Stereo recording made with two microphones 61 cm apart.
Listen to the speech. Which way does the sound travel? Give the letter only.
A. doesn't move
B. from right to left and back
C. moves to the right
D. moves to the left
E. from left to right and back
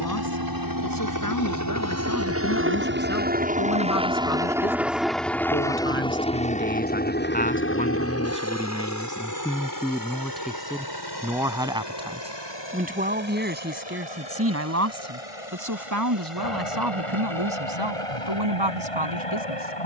C.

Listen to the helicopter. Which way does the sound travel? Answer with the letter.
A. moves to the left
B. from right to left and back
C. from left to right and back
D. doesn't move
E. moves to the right
A.